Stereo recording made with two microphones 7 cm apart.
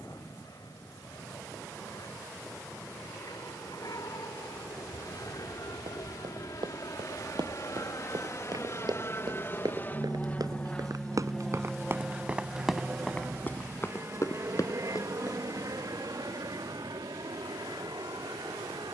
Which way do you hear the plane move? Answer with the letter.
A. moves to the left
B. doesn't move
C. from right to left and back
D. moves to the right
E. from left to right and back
D.